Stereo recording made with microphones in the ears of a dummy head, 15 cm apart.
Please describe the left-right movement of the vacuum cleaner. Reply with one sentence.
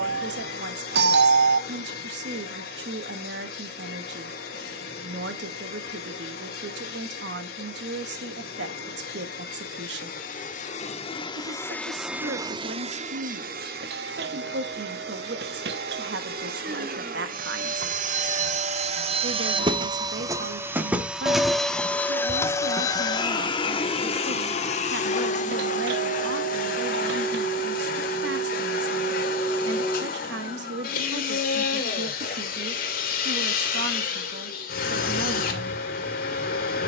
In this clip you hear the vacuum cleaner go right and come back.